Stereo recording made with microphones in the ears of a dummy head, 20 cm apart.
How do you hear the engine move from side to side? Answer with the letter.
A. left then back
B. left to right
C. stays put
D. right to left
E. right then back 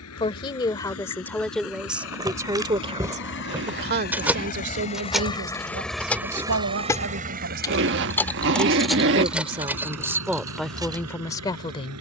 B.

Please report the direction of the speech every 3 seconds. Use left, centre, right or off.
centre, right, right, centre.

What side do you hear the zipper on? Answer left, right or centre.
right.